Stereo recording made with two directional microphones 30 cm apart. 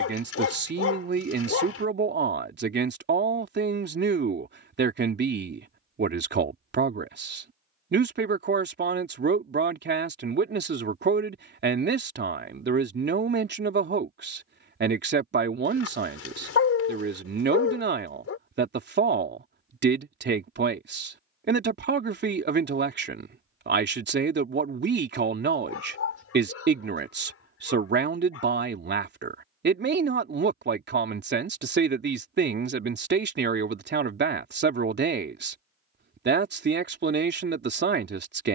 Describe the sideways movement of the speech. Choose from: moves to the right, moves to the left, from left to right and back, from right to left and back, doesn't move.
doesn't move.